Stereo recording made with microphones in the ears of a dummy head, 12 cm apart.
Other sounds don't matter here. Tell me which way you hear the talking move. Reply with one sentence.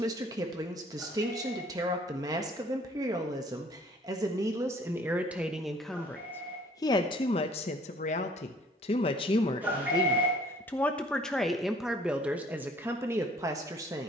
You can hear the talking go left and come back.